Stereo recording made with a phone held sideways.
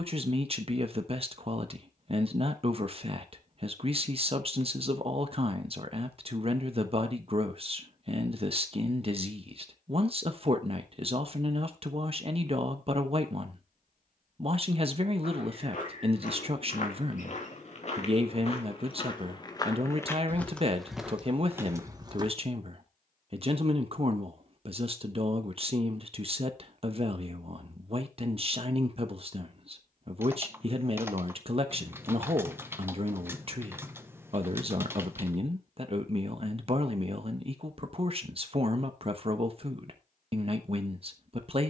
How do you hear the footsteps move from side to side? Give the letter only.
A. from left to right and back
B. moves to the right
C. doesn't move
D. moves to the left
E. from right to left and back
B.